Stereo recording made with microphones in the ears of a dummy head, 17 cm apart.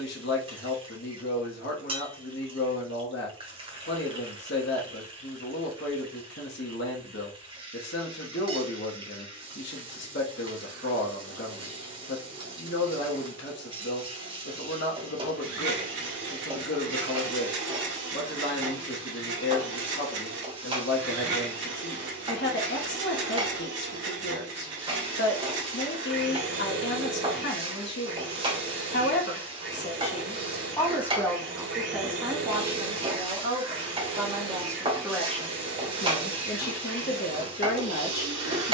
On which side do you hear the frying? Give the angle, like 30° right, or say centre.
30° right.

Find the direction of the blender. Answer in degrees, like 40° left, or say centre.
70° right.